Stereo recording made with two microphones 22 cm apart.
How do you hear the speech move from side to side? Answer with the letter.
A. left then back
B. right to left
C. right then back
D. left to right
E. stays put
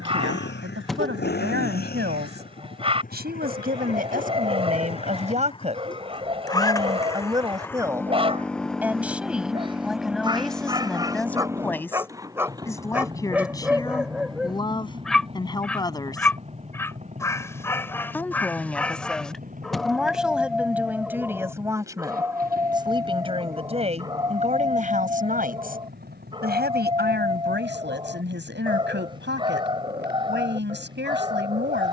A.